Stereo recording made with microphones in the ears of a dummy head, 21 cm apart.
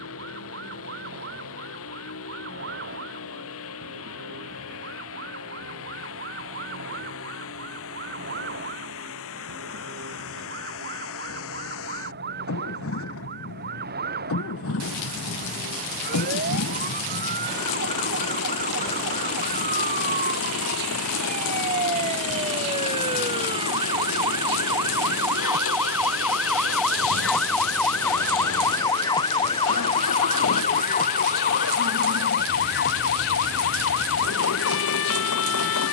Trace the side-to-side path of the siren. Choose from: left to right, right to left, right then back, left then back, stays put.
right to left.